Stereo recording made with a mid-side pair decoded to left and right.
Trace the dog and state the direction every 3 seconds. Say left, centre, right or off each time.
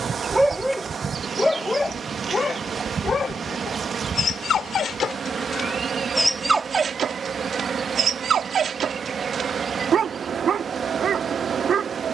centre, left, right, right.